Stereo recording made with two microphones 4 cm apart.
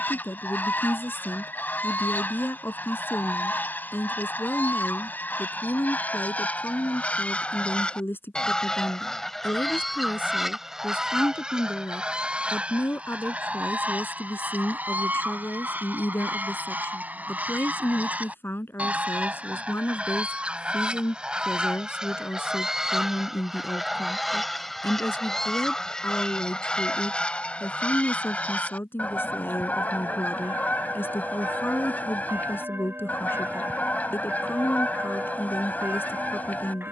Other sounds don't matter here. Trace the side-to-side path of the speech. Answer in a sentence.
In this clip you hear the speech stay put.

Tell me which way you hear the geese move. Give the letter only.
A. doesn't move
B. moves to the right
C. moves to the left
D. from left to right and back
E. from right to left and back
D.